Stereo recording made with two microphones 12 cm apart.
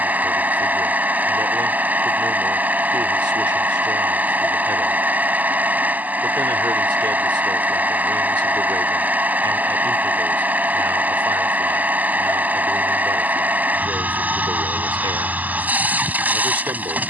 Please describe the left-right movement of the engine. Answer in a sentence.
In this clip you hear the engine stay in one place.